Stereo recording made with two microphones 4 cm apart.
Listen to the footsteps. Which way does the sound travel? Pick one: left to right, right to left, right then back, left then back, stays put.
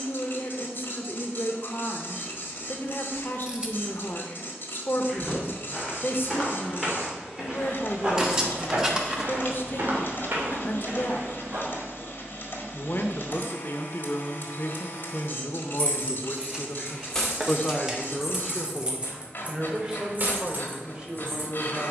left to right.